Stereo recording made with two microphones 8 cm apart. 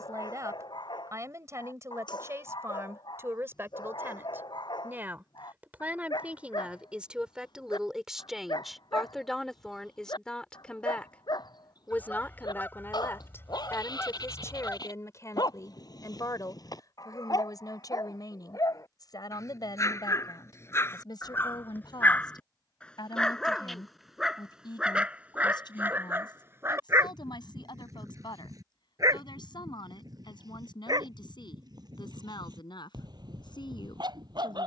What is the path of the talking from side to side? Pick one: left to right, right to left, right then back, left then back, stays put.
right to left.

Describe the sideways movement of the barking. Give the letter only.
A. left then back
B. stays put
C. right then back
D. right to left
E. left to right
E.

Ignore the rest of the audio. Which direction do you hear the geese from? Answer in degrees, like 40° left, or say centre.
20° left.